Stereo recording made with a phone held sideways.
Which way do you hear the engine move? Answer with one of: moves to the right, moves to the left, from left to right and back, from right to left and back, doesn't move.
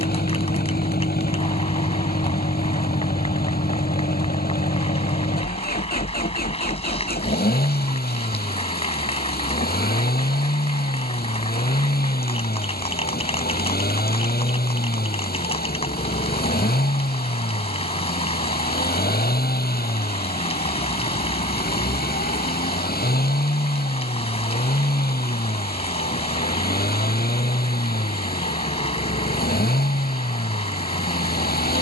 doesn't move.